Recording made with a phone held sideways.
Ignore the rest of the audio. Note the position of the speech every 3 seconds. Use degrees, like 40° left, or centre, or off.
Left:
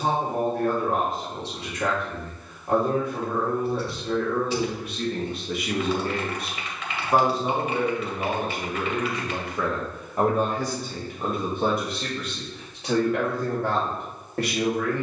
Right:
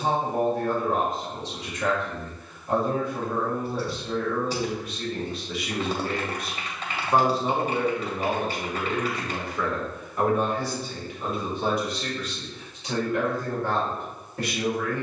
70° left, 60° left, 10° left, 40° left, 70° left.